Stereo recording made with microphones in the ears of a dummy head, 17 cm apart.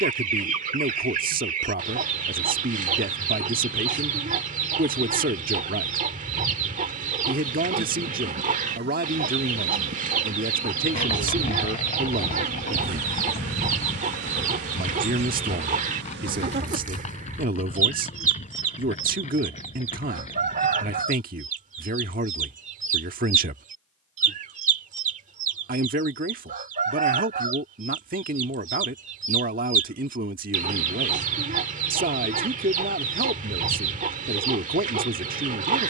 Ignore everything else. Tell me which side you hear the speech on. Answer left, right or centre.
right.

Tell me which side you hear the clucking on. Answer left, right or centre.
right.